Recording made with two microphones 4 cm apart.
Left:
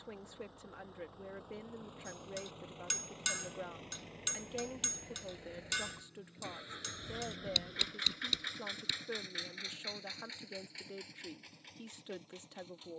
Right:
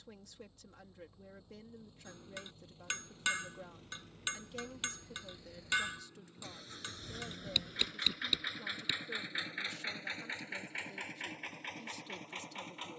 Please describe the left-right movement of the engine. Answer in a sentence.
You can hear the engine travel towards the right.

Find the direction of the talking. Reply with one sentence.
You can hear the talking on the left.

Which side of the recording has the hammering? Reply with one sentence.
In this clip you hear the hammering on the right.